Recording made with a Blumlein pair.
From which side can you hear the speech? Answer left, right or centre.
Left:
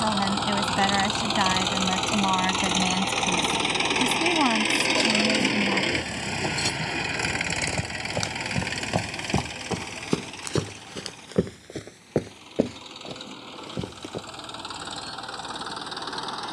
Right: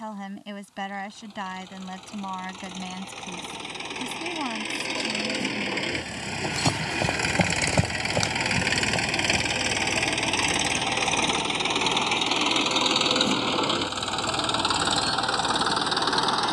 left.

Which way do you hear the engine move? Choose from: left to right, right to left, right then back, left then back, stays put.
left to right.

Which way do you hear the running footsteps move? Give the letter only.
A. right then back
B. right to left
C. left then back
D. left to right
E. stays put
B.